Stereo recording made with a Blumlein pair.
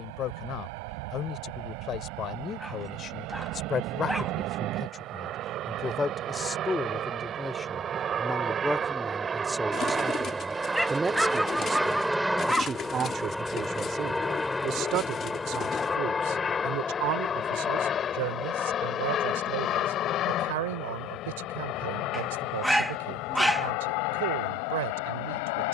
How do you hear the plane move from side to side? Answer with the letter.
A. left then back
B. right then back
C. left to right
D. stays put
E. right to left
E.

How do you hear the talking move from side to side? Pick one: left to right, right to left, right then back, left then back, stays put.
left to right.